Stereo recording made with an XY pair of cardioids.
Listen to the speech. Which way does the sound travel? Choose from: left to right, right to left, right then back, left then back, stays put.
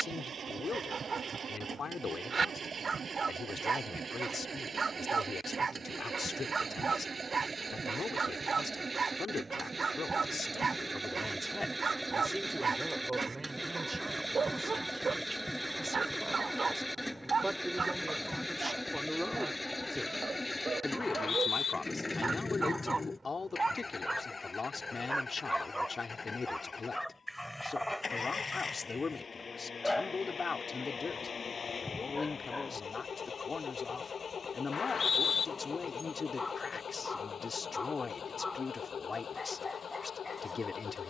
right then back.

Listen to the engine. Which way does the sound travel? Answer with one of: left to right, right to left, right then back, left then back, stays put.
right to left.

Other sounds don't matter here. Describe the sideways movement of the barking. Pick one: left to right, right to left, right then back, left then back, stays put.
right to left.